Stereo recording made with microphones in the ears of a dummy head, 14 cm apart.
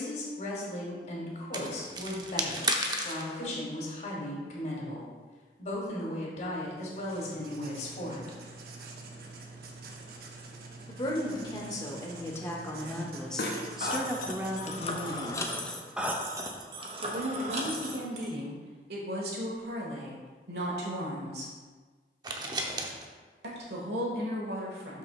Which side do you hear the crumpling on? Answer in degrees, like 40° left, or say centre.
30° right.